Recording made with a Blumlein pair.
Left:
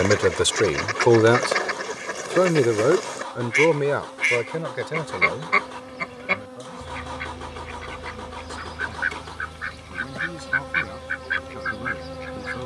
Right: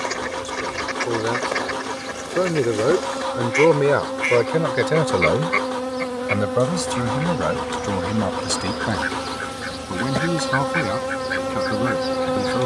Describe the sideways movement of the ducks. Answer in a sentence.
In this clip you hear the ducks stay in one place.